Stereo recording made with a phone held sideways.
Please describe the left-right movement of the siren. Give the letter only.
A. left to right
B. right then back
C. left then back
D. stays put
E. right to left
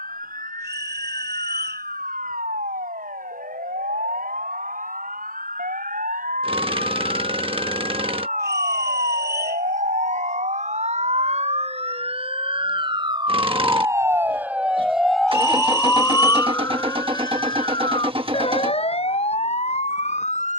E.